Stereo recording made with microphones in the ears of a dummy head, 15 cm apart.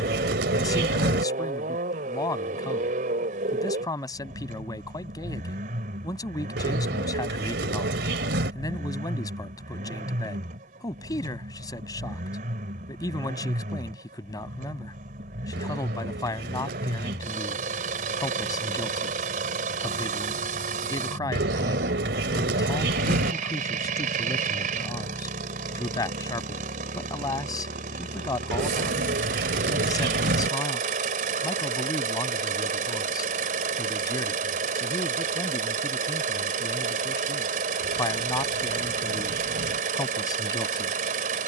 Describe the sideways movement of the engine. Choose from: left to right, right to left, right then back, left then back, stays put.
stays put.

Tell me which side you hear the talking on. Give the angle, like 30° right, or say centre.
20° left.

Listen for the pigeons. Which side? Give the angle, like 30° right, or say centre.
70° right.